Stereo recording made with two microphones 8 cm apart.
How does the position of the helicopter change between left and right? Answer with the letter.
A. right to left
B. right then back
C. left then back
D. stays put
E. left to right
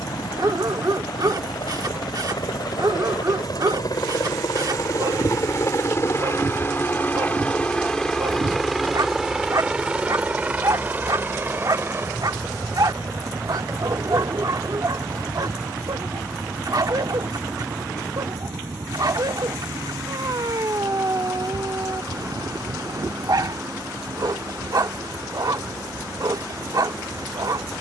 E.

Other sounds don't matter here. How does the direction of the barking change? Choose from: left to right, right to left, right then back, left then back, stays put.
stays put.